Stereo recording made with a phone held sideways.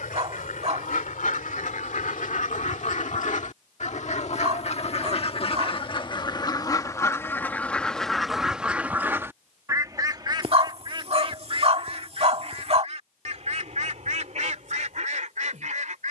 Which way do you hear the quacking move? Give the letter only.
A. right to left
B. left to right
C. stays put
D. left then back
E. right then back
B.